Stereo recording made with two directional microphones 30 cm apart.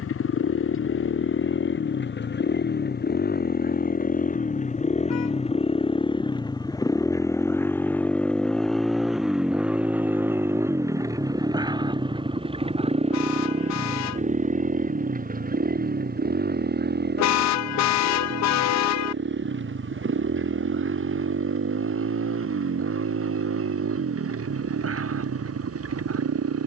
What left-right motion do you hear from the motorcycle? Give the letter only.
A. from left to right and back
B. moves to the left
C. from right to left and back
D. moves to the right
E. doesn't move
D.